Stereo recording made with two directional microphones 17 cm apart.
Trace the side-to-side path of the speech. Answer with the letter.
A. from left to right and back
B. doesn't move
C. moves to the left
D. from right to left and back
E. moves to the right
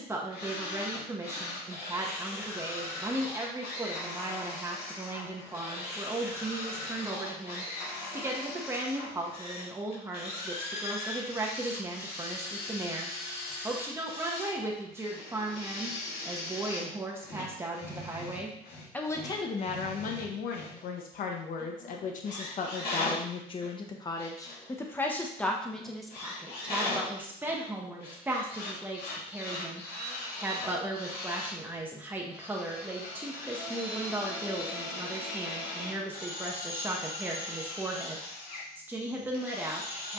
D.